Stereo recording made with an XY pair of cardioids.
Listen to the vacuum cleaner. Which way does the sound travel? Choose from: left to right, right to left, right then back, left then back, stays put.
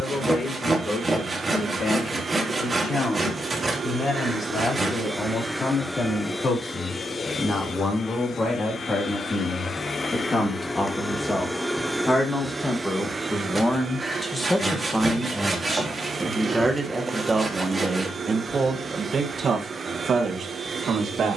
left then back.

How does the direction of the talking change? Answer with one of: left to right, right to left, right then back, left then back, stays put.
left to right.